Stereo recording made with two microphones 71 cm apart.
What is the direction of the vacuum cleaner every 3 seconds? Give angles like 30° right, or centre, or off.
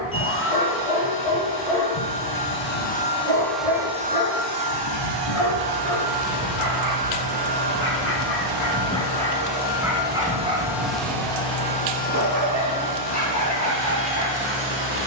20° left, 30° right, 60° right, 10° right, 20° left.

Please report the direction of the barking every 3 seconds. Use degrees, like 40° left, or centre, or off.
50° left, 40° left, 20° left, 10° right, 20° right.